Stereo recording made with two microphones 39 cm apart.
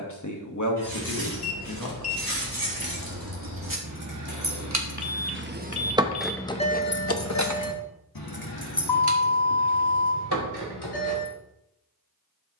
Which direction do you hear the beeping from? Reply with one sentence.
You can hear the beeping on the left.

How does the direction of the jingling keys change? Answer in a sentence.
You can hear the jingling keys go from the right side to the left.